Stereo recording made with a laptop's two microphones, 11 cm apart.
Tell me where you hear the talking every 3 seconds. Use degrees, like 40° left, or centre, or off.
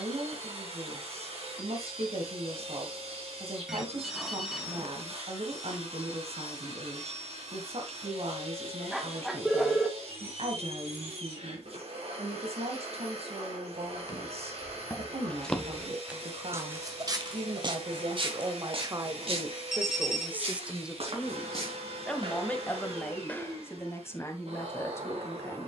70° right, 70° right, 70° right, 70° right, 70° right, 70° right, 30° right, 10° left, 20° left.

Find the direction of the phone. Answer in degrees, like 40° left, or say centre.
centre.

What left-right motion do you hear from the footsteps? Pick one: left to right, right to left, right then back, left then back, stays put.
right then back.